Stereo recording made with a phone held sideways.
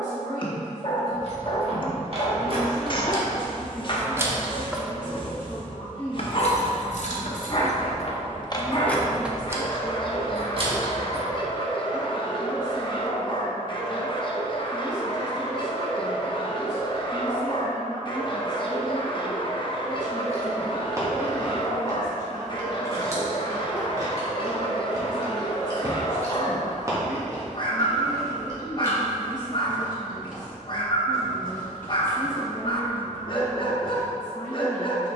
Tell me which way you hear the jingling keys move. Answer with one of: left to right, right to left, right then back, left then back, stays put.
left then back.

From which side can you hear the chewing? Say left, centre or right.
right.